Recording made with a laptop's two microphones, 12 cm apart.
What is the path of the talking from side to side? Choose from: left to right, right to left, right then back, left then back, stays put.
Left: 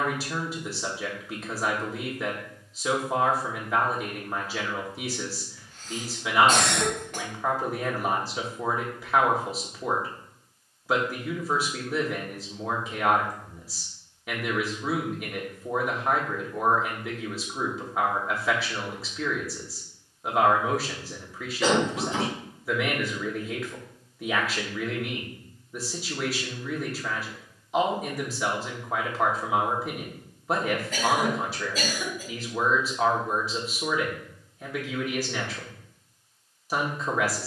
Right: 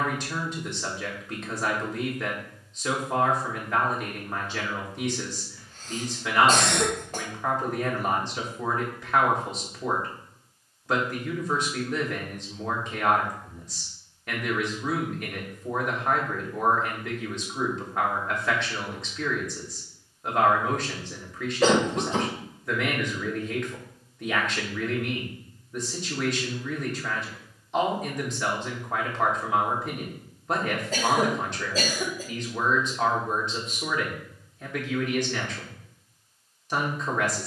stays put.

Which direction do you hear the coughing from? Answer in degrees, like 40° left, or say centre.
40° right.